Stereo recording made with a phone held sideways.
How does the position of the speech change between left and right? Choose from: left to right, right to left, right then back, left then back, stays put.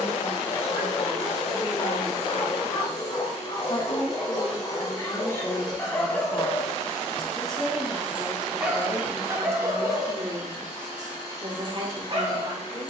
left to right.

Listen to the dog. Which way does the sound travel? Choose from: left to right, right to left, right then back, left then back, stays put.
left to right.